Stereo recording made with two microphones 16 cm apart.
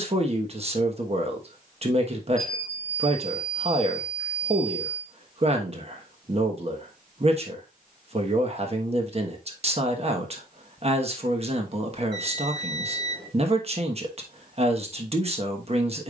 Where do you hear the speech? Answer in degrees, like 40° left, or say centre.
40° right.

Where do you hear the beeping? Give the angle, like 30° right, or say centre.
30° right.